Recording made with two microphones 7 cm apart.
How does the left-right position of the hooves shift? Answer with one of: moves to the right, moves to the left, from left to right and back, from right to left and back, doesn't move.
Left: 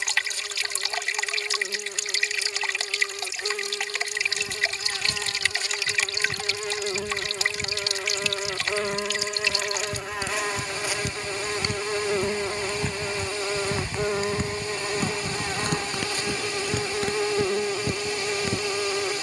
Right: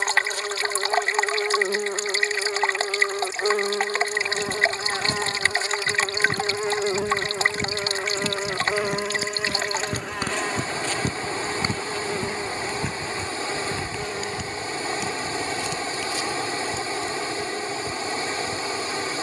moves to the left.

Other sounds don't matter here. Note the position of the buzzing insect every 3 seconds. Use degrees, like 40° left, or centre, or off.
60° right, 40° right, 20° right, 10° left, 30° left, 40° left, 50° left.